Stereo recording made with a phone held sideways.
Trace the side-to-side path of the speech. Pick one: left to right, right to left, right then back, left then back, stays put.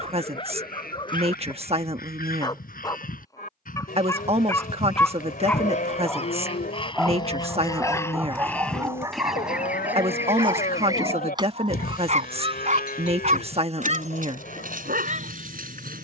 stays put.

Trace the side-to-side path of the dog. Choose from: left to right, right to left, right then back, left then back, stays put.
left to right.